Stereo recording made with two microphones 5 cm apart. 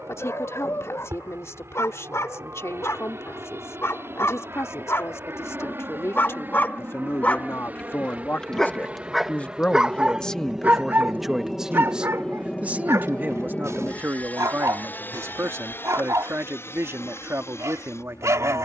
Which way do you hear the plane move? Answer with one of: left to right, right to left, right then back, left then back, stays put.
right to left.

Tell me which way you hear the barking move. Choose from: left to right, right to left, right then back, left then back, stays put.
left to right.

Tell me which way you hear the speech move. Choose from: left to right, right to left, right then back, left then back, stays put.
left to right.